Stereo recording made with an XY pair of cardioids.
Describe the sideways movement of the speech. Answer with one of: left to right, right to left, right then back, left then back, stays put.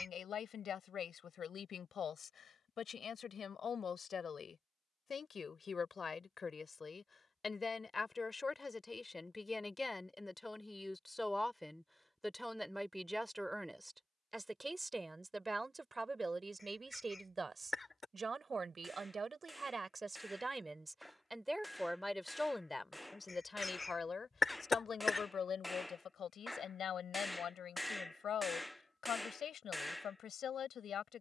right then back.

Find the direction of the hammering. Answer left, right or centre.
centre.